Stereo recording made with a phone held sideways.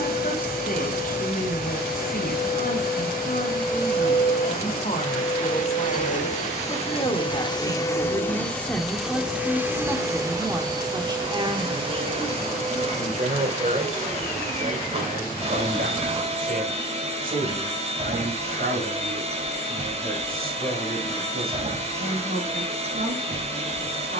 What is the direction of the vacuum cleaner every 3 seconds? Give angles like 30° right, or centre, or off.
70° left, 70° left, 30° left, 20° right, 40° right, 40° right, 40° right, 40° right.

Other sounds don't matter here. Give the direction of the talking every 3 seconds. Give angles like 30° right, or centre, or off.
60° left, 50° left, 20° left, 20° right, 50° right, 60° right, 70° right, 80° right.